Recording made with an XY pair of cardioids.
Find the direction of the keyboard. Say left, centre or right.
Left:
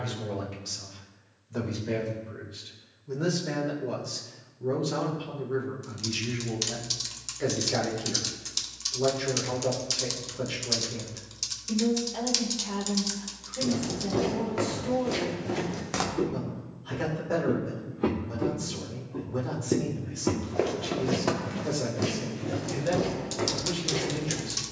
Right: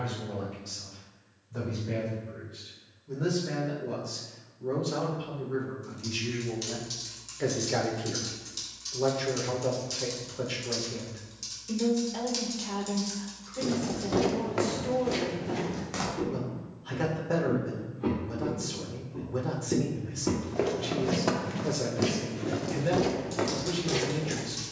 left.